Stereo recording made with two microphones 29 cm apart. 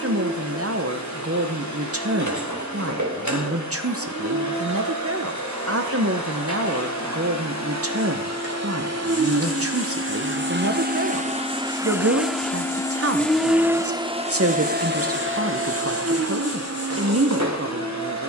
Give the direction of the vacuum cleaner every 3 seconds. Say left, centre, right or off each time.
right, right, right, right, centre, right.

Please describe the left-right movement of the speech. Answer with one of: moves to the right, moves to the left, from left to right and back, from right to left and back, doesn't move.
doesn't move.